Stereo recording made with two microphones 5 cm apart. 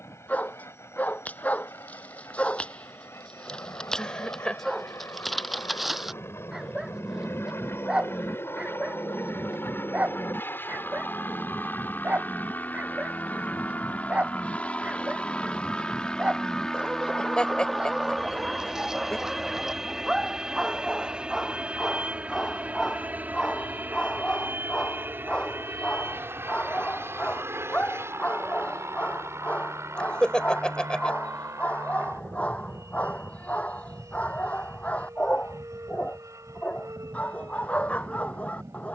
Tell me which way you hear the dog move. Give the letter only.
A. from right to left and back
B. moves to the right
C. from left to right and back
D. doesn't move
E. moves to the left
C.